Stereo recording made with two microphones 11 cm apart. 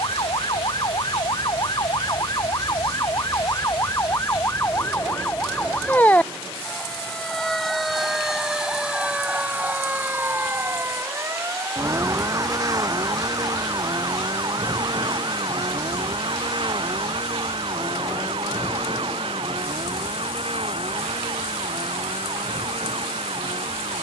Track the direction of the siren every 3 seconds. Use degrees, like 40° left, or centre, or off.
40° left, 30° left, centre, 20° right, 40° right, 50° right, 60° right, 60° right.